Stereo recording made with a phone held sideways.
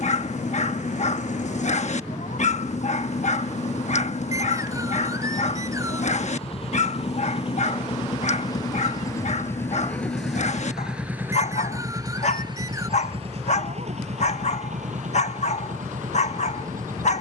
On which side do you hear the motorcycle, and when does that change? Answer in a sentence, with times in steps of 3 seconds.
You can hear the motorcycle on the left from 0 s, in the centre from 9 s and on the right from 12 s.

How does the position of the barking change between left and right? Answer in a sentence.
In this clip you hear the barking stay put.